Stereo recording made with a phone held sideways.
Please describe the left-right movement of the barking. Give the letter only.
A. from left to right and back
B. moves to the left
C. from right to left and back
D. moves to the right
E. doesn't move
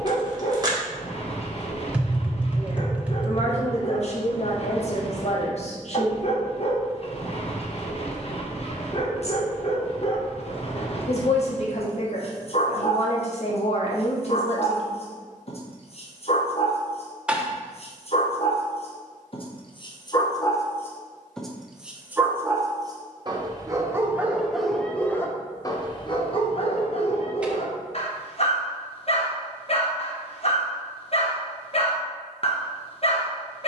A.